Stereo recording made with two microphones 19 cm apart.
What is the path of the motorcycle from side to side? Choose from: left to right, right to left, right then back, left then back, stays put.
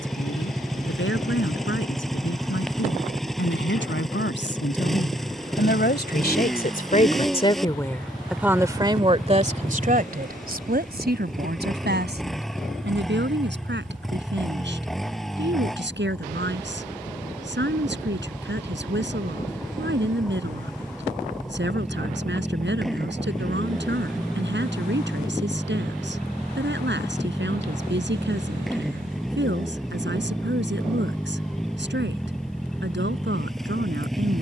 stays put.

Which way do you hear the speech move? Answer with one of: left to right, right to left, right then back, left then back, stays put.
left to right.